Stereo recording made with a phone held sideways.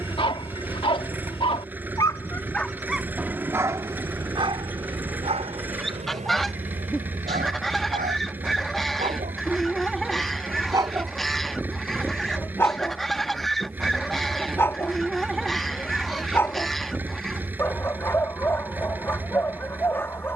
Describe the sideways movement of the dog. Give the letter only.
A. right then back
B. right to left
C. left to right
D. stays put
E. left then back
A.